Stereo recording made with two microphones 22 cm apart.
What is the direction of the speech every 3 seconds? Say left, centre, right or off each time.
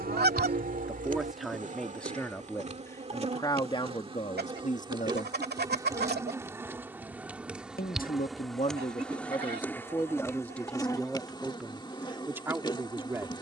centre, left, left, centre, centre.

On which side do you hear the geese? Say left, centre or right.
right.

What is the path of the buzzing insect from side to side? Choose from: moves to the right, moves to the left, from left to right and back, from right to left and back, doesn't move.
moves to the left.